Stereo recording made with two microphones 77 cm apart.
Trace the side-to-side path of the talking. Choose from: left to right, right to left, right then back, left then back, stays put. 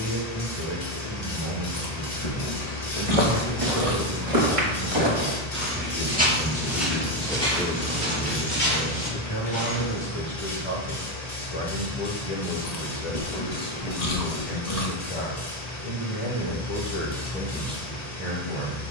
left then back.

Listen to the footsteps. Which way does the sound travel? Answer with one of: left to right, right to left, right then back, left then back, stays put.
right to left.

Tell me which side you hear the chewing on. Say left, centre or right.
left.